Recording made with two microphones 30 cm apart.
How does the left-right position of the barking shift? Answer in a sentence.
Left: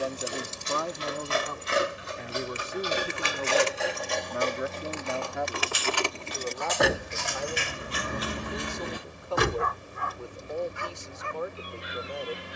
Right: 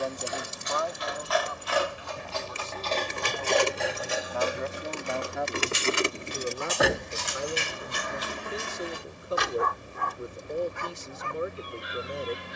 You can hear the barking move to the right.